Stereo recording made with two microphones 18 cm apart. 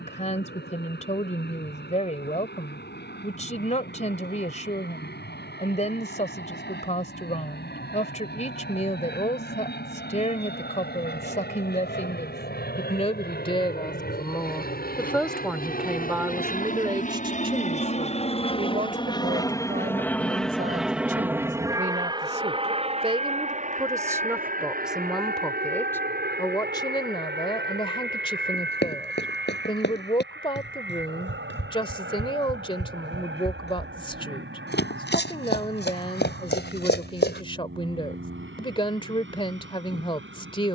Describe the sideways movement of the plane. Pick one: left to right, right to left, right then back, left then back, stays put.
left to right.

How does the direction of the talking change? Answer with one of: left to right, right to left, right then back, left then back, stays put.
right then back.